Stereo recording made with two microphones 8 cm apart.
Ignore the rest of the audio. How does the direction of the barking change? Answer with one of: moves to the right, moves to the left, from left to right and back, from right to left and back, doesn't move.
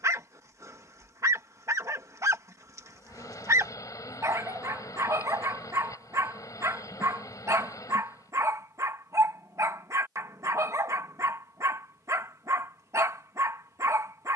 doesn't move.